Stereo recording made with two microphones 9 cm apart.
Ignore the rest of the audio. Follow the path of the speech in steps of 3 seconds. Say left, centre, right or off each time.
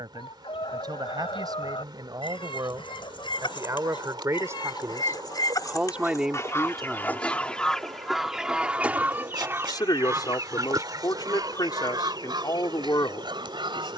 right, right, centre, left, left.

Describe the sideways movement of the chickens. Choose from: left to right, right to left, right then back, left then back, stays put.
left to right.